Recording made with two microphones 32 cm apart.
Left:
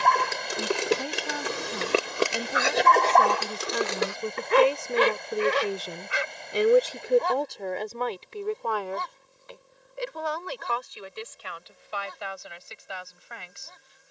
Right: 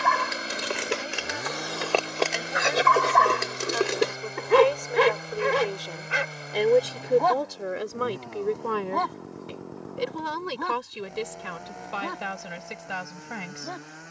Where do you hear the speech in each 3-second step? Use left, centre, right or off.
left, left, centre, right, right.